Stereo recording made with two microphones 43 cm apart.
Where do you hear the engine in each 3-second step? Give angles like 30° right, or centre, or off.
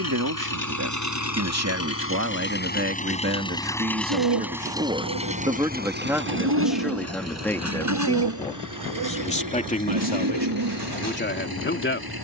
40° left, centre, 40° right, 50° right.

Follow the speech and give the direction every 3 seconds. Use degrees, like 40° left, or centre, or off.
40° right, 20° right, centre, 20° left.